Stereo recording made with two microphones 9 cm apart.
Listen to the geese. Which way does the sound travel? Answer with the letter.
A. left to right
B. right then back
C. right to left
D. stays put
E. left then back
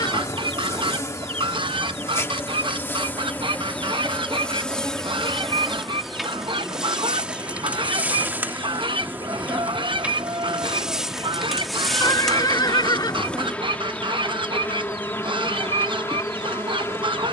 D.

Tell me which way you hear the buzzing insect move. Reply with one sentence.
In this clip you hear the buzzing insect move from left to right and back again.